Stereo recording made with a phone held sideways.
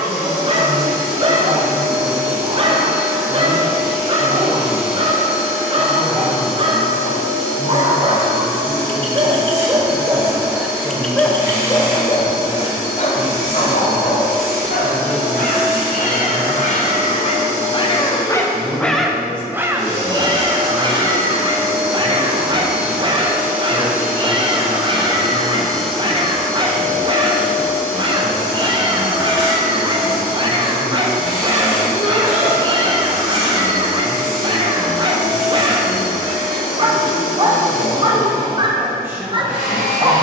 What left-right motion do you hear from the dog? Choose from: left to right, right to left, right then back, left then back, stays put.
left then back.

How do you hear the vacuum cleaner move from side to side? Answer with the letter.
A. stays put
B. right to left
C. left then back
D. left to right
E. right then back
B.